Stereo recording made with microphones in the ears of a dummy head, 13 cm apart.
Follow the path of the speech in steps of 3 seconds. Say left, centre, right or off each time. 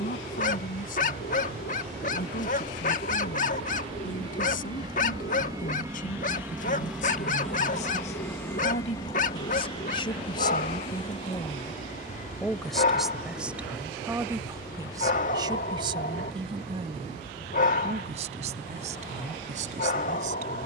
left, left, left, left, centre, right, right.